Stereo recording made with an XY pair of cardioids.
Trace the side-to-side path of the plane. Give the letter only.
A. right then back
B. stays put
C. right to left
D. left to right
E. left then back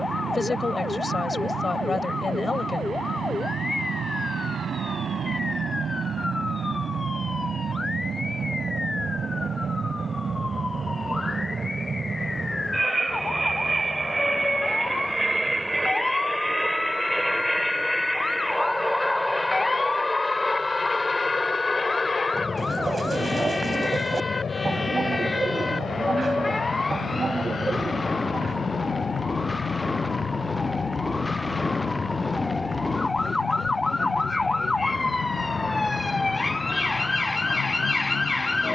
C.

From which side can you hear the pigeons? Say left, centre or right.
right.